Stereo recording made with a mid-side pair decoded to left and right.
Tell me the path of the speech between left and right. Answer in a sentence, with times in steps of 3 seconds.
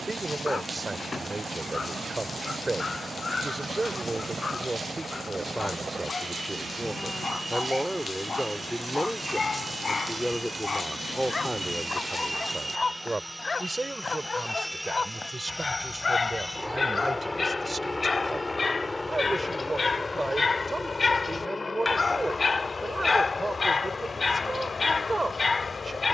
You can hear the speech on the right from 0 s, in the centre from 6 s and on the right from 12 s.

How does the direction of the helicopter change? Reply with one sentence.
In this clip you hear the helicopter move to the left.